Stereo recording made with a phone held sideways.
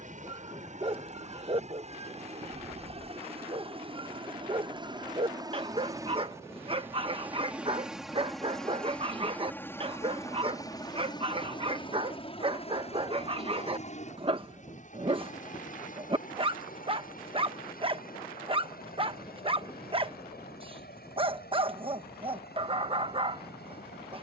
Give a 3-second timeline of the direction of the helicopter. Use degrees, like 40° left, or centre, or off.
50° right, 30° right, 10° right, 20° left, 40° left, 50° left, 60° left, 70° left.